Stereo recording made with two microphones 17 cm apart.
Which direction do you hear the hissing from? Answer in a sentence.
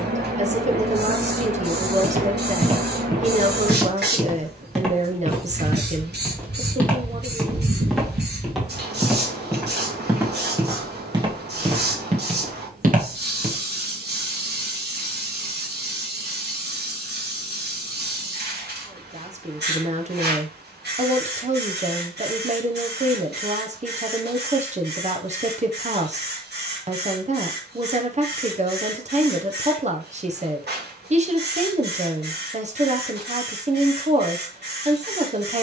You can hear the hissing on the right.